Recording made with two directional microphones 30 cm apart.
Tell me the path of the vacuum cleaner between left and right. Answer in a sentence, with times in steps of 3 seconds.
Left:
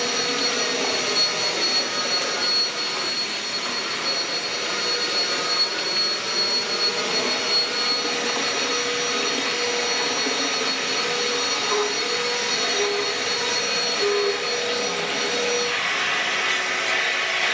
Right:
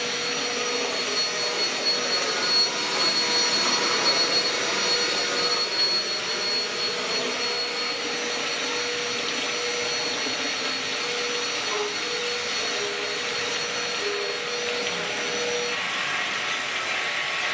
In this clip you hear the vacuum cleaner on the left from 0 s, in the centre from 3 s and on the left from 6 s.